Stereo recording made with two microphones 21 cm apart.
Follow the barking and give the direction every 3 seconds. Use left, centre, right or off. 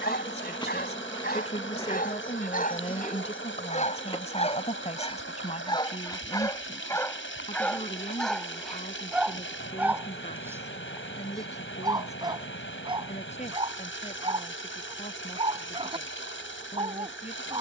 left, left, centre, centre, right, right.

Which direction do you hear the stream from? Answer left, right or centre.
left.